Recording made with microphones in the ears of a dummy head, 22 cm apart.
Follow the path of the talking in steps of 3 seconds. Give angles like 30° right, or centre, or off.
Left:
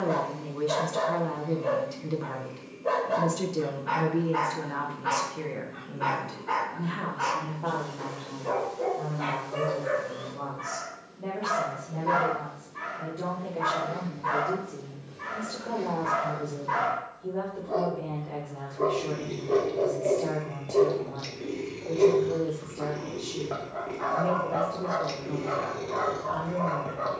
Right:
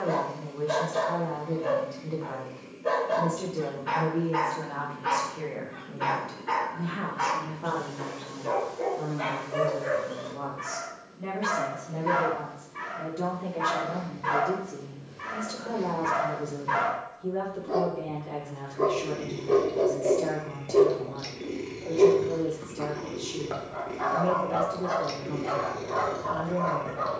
30° left, 20° left, 10° right, 30° right, 30° right, 30° right, 30° right, 30° right, 30° right.